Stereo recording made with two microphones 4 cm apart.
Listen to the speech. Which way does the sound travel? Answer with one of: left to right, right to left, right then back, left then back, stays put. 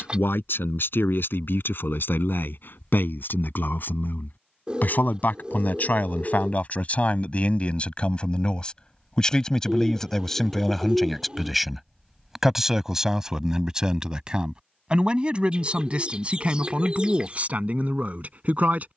left to right.